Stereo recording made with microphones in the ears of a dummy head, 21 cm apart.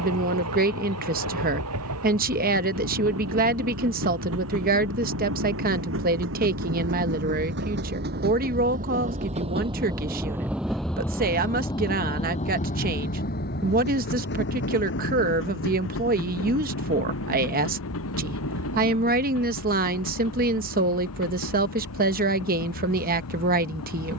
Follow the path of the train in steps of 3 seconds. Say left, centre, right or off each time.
right, right, right, centre, left, left, left, left.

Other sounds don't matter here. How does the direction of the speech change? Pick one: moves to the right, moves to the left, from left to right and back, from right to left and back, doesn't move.
doesn't move.